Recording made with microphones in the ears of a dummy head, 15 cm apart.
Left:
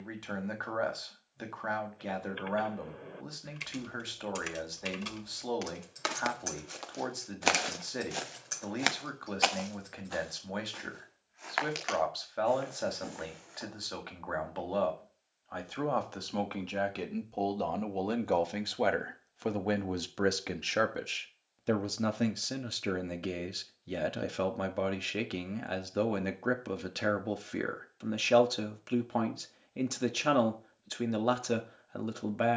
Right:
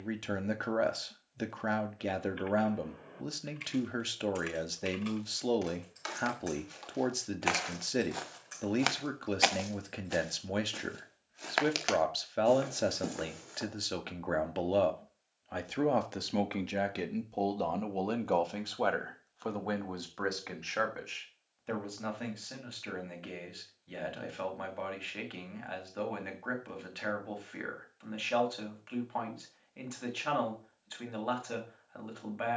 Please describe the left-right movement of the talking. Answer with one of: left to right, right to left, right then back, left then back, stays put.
right to left.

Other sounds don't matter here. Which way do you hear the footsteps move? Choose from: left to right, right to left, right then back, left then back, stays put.
left to right.